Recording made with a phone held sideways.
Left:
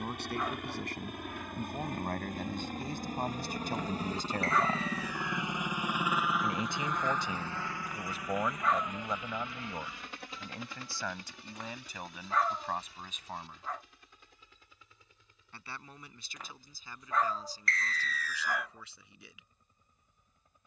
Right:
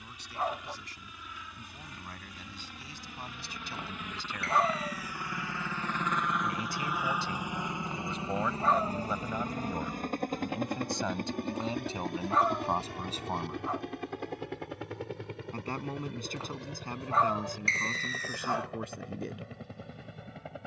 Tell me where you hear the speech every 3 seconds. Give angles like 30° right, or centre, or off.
60° left, 50° left, 10° left, 20° right, 30° right, 50° right, 50° right.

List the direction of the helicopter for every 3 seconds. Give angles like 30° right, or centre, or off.
60° left, 30° left, 10° right, 50° right, 60° right, 70° right, 70° right.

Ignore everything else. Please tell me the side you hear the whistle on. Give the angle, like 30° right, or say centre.
30° right.